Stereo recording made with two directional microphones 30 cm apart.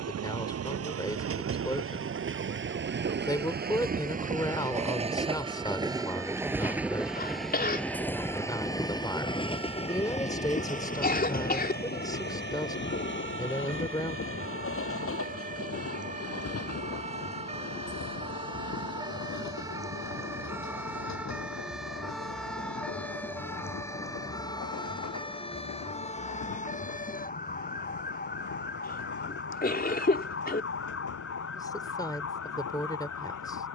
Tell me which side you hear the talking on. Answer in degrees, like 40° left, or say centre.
10° left.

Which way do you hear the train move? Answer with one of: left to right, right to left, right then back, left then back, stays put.
right to left.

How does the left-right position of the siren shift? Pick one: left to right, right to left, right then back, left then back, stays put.
right to left.